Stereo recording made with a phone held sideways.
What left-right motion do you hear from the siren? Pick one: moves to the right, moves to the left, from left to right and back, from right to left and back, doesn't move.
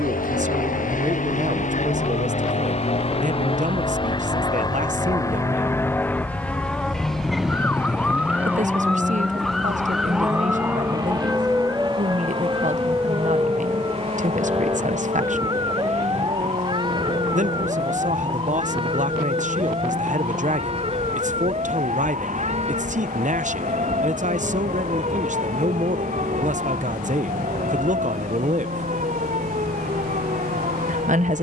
moves to the right.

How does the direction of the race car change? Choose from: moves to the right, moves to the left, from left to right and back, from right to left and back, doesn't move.
moves to the right.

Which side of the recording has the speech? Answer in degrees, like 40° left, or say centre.
50° right.